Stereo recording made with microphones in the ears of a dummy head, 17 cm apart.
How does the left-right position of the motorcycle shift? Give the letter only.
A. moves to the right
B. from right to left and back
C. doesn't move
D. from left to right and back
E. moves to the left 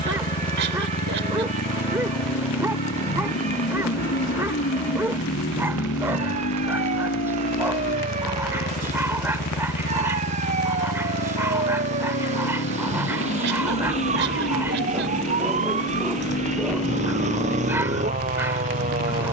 C.